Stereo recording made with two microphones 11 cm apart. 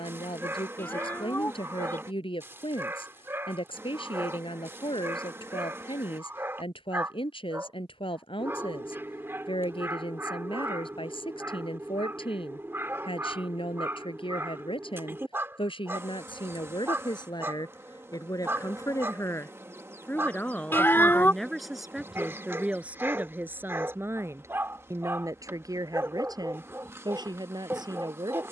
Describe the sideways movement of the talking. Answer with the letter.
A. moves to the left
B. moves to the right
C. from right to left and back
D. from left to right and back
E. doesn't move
B.